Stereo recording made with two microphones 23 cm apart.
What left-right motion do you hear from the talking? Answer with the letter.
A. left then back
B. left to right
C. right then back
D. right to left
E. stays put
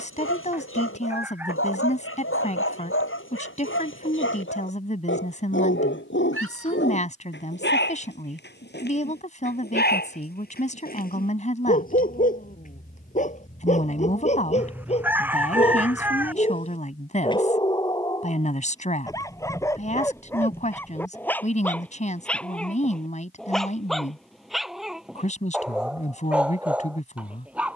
E.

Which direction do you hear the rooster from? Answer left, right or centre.
centre.